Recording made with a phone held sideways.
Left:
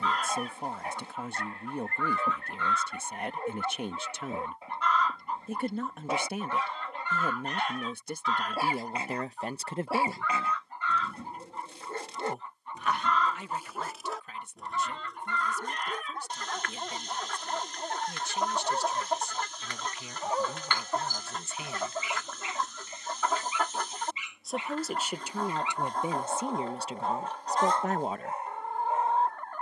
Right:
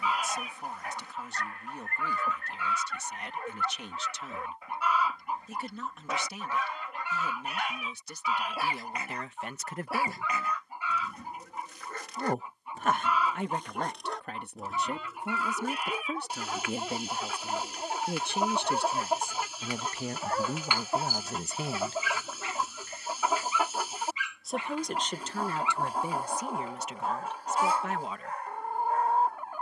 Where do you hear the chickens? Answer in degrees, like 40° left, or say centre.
10° right.